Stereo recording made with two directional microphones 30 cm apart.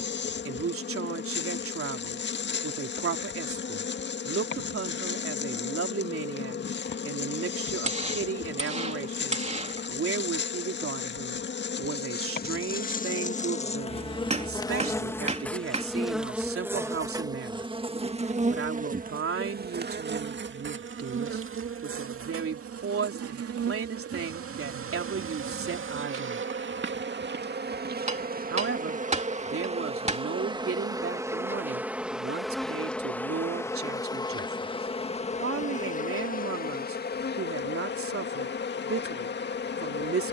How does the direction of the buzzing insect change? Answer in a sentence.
You can hear the buzzing insect move from left to right and back again.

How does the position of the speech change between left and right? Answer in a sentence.
In this clip you hear the speech stay in one place.